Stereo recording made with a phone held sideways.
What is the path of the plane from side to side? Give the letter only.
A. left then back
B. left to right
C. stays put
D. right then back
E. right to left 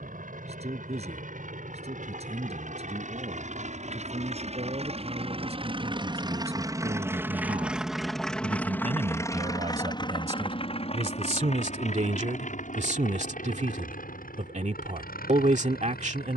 E.